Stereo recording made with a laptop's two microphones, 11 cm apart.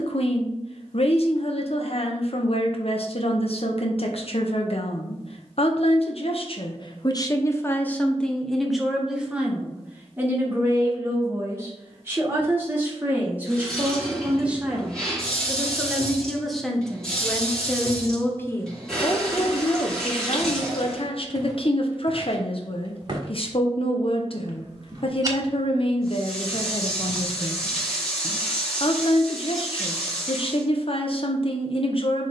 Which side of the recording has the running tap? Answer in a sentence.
You can hear the running tap in the centre.